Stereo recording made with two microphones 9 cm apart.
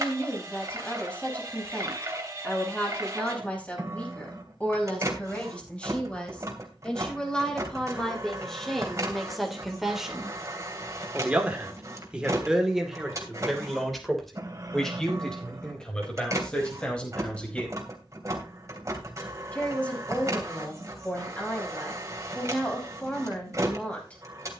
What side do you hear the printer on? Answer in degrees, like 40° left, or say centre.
40° right.